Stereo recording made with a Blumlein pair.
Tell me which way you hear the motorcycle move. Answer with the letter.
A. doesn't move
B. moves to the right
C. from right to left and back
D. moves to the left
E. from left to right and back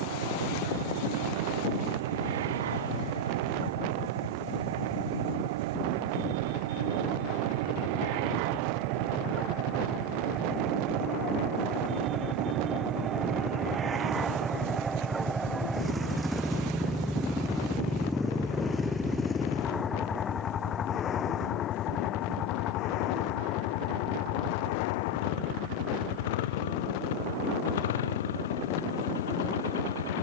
D.